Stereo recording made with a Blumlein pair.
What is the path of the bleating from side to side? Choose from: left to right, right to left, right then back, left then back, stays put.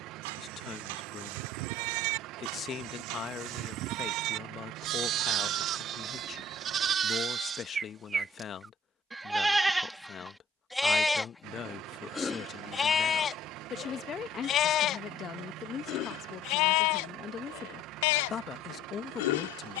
right to left.